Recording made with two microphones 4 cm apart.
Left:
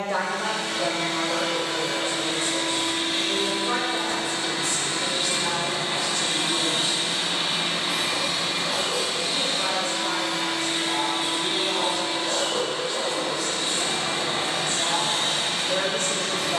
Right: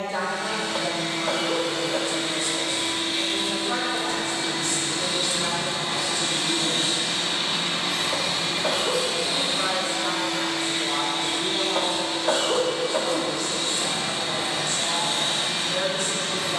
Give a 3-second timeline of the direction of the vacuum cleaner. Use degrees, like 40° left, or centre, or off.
70° left, 50° left, 10° left, 10° left, 50° left, 70° left.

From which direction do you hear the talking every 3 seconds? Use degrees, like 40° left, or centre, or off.
50° left, 10° left, 10° right, 20° right, 10° left, 50° left.